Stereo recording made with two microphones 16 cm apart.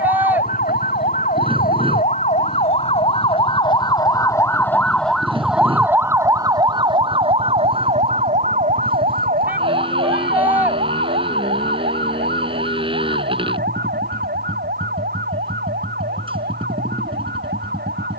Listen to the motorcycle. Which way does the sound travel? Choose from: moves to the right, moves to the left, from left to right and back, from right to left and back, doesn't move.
doesn't move.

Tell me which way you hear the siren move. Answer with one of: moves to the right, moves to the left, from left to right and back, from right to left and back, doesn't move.
moves to the right.